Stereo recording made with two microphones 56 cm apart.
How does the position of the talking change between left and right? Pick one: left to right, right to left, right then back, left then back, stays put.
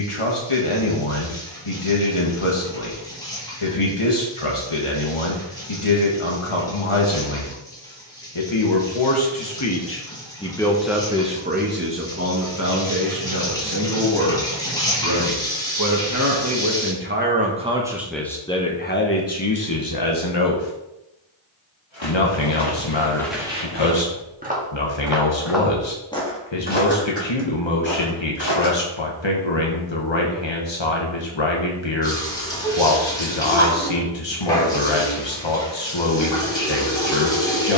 right then back.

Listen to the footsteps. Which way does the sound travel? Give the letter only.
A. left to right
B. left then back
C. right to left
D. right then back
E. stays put
D.